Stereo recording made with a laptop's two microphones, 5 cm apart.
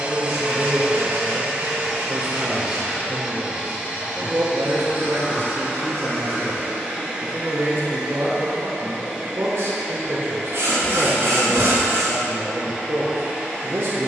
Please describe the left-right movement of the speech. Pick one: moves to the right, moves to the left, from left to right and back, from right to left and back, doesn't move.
doesn't move.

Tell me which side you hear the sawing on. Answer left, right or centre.
right.